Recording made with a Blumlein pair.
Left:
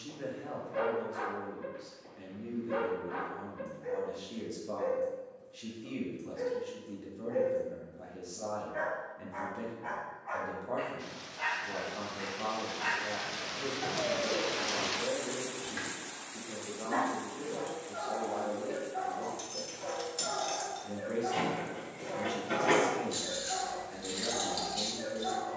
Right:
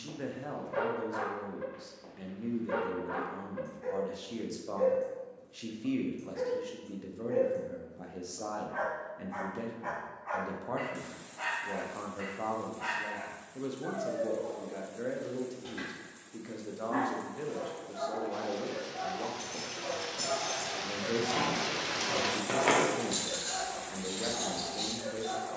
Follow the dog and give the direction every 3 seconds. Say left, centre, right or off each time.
right, right, right, centre, left, left, left, left, left.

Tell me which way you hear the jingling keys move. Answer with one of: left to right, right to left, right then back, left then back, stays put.
right then back.